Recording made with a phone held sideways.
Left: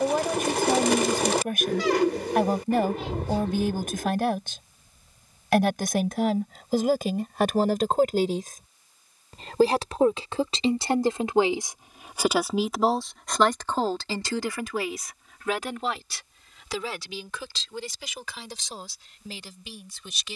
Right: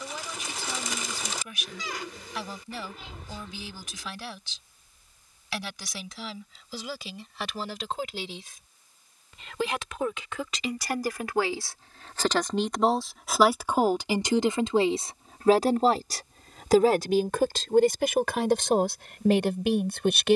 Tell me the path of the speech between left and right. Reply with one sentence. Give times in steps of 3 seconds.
You can hear the speech on the left from 0 s, in the centre from 12 s and on the right from 15 s.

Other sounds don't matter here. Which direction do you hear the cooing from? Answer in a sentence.
You can hear the cooing on the left.